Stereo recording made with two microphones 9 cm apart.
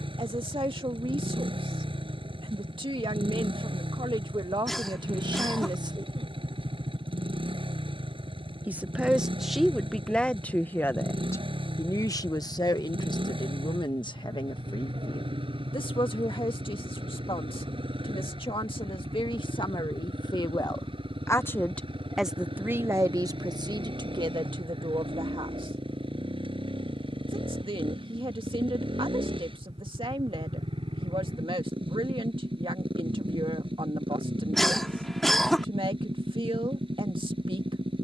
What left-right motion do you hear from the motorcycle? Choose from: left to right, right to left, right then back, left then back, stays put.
stays put.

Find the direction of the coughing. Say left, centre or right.
centre.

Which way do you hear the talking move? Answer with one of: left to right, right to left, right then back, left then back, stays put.
left then back.